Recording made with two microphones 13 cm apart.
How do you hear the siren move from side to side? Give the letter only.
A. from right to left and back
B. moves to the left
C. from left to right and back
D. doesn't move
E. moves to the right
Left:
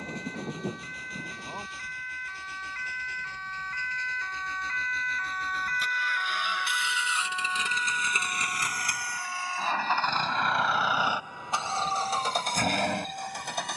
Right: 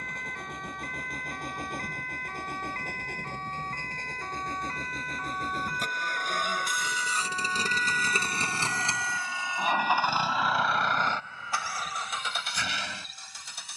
B.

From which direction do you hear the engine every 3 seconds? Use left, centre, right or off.
right, right, right, centre, left.